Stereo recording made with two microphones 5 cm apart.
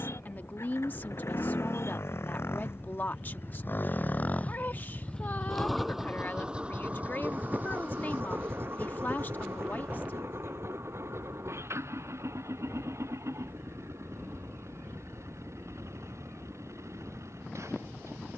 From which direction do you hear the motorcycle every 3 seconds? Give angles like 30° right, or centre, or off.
70° left, 30° left, 30° right, 60° right, 70° right, 70° right.